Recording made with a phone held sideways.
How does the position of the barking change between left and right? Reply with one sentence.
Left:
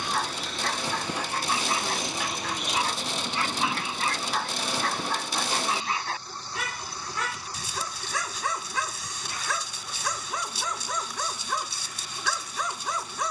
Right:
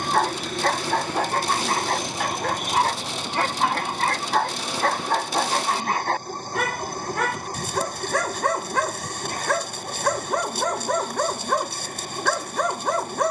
In this clip you hear the barking stay put.